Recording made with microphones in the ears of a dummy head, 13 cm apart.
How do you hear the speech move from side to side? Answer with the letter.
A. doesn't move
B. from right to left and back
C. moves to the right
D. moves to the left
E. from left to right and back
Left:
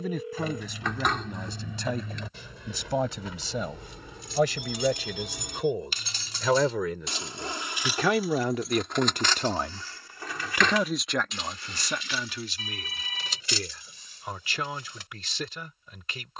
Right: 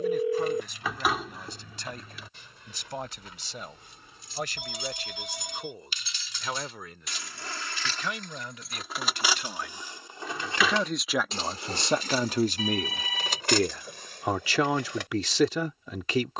C.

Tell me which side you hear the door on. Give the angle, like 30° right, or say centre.
10° right.